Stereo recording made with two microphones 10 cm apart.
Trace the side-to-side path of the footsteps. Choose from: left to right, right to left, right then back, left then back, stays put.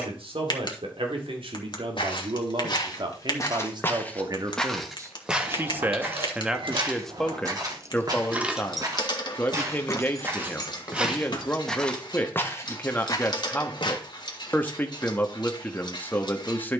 right then back.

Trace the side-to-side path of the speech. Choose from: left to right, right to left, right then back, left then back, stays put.
right to left.